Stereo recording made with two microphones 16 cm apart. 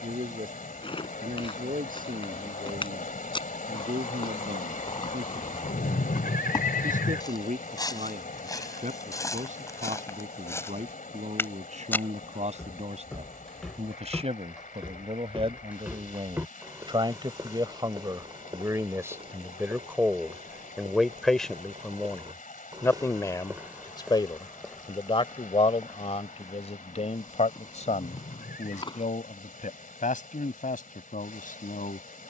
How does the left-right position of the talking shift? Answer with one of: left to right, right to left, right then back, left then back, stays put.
right to left.